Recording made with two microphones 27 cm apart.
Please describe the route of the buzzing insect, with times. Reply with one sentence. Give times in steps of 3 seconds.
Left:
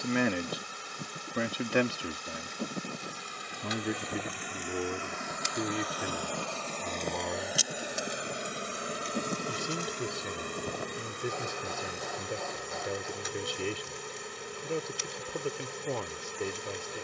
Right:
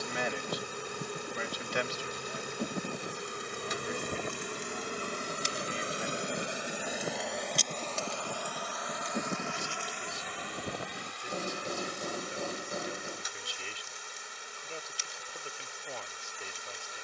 In this clip you hear the buzzing insect on the right from 0 s, in the centre from 6 s and on the left from 9 s.